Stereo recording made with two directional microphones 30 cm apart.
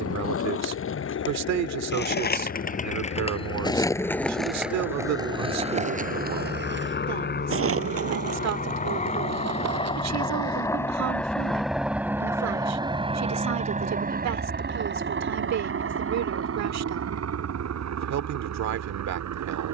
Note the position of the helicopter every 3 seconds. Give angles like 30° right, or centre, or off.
60° left, 50° left, 40° left, 10° left, 20° right, 50° right, 60° right.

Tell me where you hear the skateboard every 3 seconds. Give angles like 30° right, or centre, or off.
40° left, centre, 50° right, 60° right, off, off, off.